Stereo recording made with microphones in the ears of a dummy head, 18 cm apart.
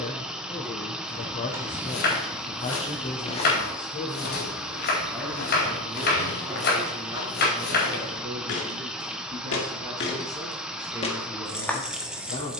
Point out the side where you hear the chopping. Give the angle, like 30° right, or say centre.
50° left.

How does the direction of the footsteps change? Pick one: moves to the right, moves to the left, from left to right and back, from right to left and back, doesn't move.
from right to left and back.